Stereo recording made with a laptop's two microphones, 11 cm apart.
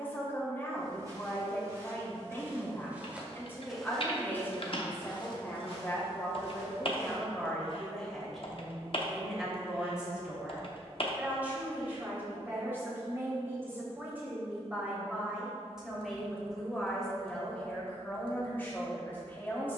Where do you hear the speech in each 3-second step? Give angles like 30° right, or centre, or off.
20° left, 20° left, 10° left, 10° right, 20° right, centre, 20° left.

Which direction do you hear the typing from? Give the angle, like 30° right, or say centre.
50° left.